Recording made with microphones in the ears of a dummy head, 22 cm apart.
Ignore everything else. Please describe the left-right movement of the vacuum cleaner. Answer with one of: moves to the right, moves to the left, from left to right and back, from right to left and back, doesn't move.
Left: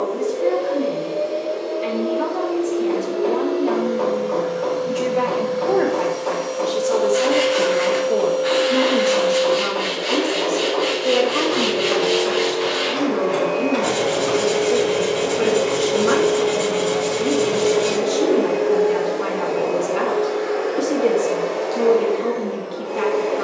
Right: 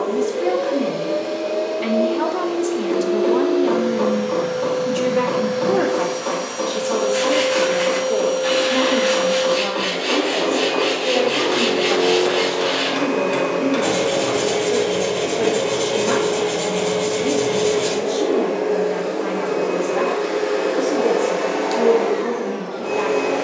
from right to left and back.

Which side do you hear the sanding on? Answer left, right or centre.
right.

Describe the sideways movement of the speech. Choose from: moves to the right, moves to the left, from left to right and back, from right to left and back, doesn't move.
moves to the left.